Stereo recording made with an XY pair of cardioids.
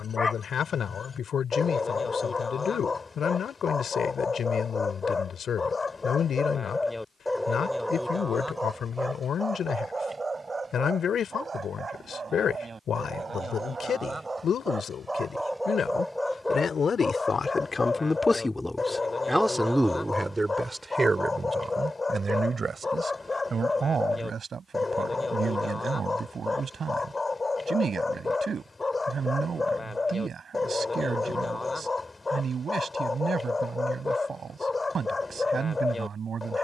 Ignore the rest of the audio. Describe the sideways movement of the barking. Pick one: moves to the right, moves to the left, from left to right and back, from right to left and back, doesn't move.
from left to right and back.